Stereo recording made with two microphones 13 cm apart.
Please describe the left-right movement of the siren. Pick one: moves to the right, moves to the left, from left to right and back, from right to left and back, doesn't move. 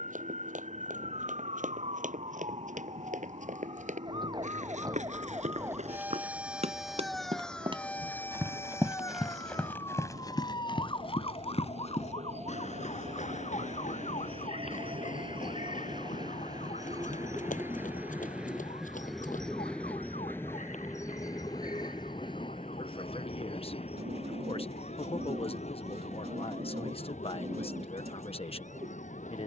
moves to the left.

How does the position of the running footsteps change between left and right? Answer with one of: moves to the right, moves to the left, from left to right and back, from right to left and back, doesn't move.
moves to the left.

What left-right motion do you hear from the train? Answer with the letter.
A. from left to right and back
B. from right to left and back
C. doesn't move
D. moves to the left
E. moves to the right
D.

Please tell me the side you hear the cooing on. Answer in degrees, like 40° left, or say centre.
50° right.